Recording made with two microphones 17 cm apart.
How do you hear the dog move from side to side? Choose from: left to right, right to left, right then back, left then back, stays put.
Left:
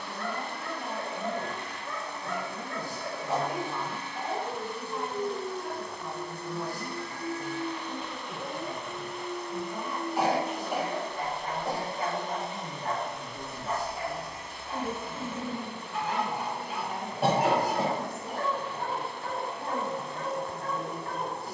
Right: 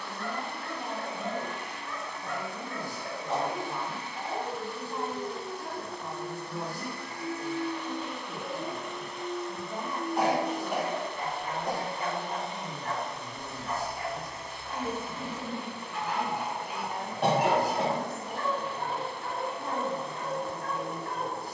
stays put.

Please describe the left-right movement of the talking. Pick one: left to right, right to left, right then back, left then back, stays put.
right to left.